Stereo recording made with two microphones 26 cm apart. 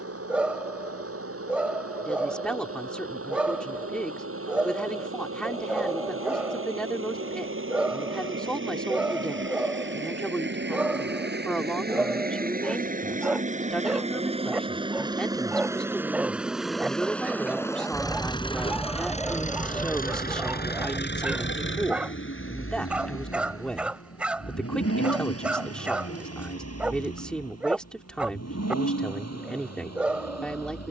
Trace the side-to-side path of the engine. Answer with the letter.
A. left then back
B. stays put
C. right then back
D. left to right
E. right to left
E.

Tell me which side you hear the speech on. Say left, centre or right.
centre.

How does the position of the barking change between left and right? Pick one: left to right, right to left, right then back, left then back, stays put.
stays put.